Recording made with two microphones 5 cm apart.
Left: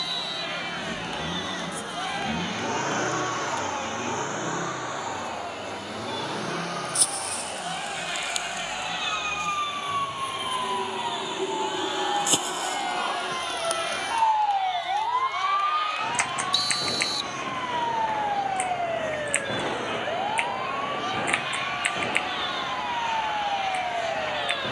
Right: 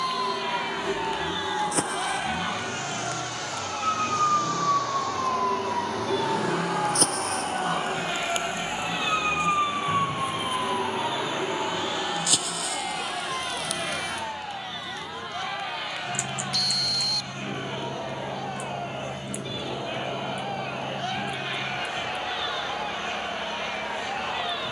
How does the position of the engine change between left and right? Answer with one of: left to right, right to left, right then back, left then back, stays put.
left to right.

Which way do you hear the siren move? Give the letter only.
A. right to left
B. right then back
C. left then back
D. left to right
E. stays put
A.